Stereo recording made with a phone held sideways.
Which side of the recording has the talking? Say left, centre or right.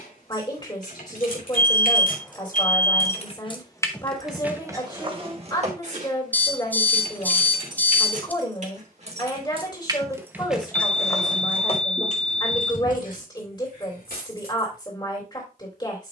left.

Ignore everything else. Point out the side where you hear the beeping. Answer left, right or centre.
centre.